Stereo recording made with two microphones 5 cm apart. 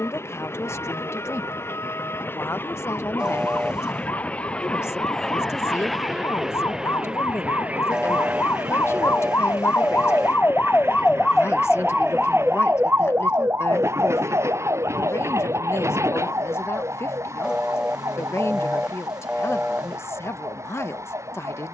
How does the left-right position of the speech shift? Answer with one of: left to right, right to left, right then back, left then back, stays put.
stays put.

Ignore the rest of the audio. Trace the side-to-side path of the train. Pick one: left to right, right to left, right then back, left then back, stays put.
left to right.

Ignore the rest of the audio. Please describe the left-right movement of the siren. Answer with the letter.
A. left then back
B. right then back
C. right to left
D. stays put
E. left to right
E.